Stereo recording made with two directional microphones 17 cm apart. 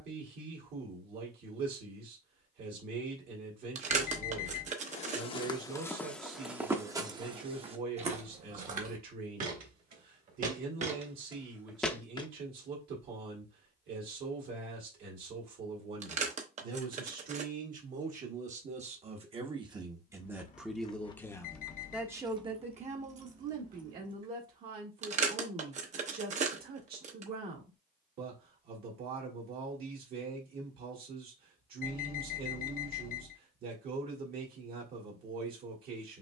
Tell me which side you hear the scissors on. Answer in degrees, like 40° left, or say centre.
40° right.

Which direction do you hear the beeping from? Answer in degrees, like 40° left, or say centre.
50° left.